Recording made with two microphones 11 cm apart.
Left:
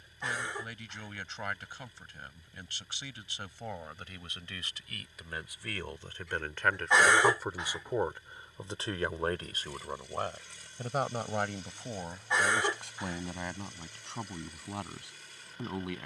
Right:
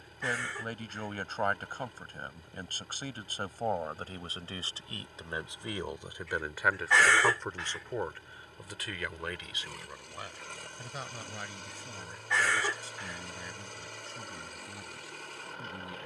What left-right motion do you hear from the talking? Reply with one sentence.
You can hear the talking travel towards the left.